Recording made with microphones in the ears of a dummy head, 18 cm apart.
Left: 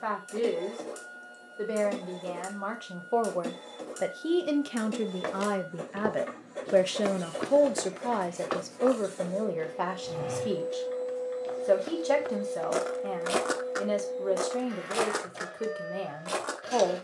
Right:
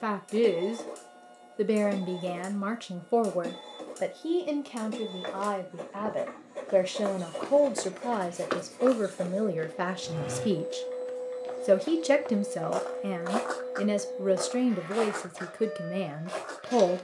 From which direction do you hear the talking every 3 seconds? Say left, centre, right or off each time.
right, centre, centre, right, right, right.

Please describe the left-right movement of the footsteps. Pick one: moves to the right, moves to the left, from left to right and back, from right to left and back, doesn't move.
from left to right and back.